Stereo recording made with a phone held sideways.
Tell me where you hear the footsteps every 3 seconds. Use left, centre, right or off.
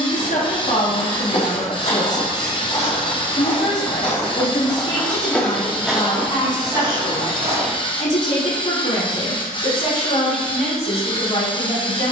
left, left, right, off.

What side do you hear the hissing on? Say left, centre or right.
left.